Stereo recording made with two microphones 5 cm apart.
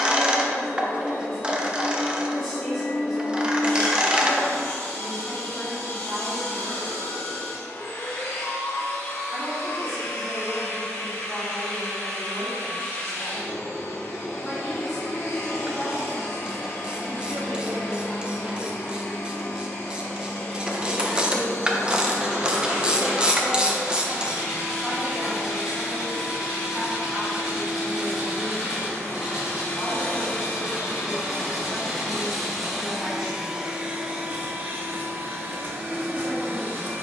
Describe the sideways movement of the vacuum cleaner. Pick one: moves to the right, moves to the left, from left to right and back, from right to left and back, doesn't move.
moves to the right.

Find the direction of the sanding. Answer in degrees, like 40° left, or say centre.
10° right.